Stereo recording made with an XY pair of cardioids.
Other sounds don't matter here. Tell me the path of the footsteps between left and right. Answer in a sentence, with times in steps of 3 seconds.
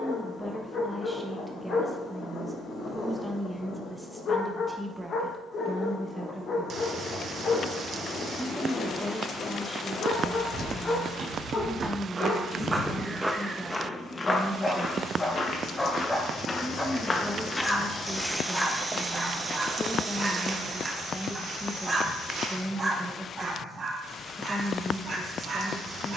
In this clip you hear the footsteps not at all from 0 s, on the right from 9 s, in the centre from 12 s, on the left from 15 s, on the right from 18 s and not at all from 24 s.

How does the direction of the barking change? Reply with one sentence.
In this clip you hear the barking travel towards the right.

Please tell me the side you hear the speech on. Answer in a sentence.
In this clip you hear the speech in the centre.